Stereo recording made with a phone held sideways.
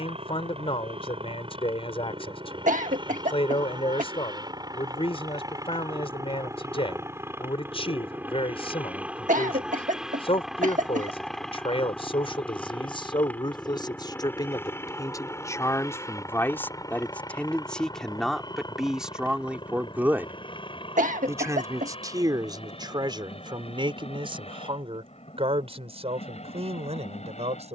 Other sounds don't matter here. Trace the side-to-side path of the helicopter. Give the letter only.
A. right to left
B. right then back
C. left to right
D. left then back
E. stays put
A.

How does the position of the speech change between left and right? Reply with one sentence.
You can hear the speech move to the right.